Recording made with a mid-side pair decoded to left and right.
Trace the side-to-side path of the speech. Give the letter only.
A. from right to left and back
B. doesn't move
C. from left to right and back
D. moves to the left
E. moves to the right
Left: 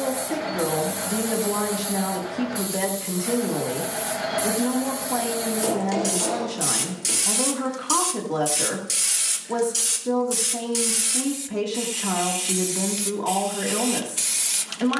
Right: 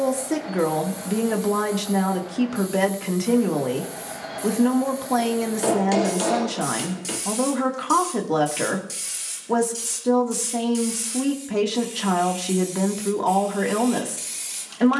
B.